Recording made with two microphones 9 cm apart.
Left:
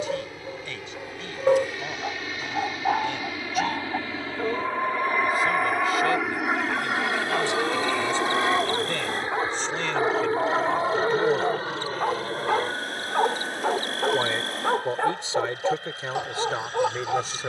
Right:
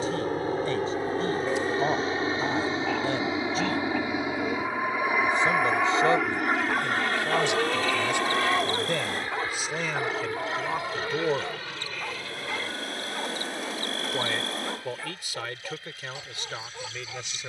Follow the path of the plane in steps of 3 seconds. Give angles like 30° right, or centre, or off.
40° right, 10° right, 10° left, 30° left, 40° left, 50° left.